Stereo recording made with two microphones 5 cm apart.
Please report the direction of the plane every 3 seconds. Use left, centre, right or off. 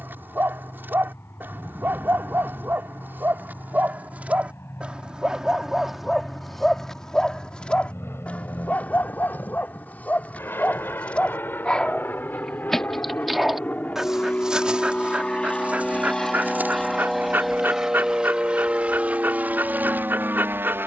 left, left, left, left, left, centre, right.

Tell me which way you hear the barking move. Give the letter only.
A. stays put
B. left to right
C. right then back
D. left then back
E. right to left
D.